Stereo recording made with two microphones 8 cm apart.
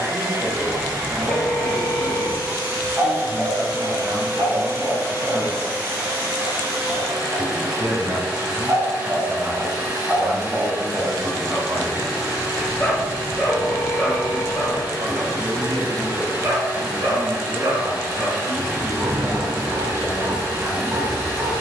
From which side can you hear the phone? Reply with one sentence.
In this clip you hear the phone in the centre.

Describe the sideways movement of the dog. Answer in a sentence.
You can hear the dog move from right to left and back again.